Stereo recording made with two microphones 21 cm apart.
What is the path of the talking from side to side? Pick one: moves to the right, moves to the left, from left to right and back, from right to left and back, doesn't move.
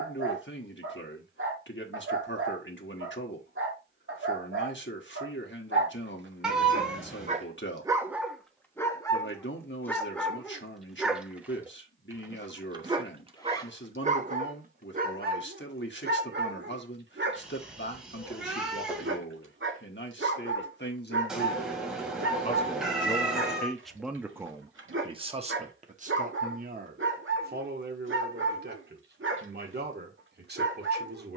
moves to the right.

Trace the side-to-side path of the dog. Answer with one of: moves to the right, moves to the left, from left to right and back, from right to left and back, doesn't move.
from right to left and back.